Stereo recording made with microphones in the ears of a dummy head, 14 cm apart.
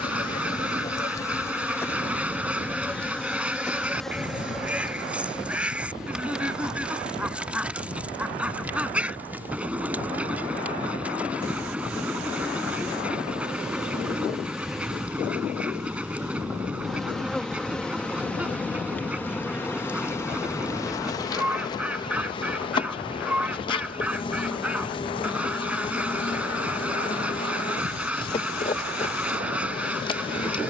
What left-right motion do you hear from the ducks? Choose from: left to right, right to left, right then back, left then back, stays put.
stays put.